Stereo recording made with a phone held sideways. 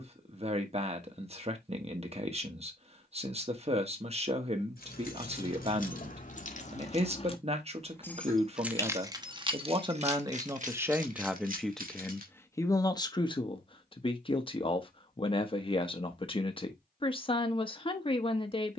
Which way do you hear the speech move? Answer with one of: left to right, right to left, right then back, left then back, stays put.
right to left.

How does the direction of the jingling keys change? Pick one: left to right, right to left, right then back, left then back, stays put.
left to right.